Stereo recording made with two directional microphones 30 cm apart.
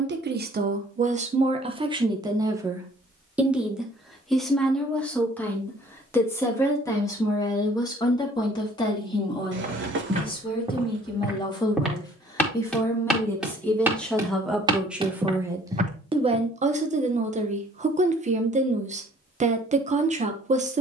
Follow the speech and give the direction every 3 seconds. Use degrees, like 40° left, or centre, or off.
20° right, centre, 10° left, 20° left, centre, 20° right, 20° right.